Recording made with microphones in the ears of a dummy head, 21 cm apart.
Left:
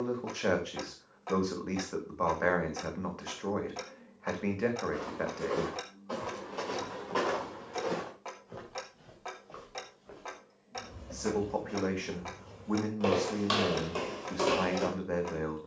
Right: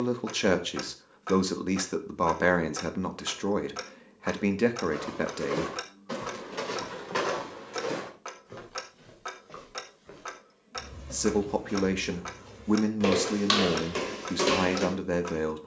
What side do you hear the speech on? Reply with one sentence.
You can hear the speech on the right.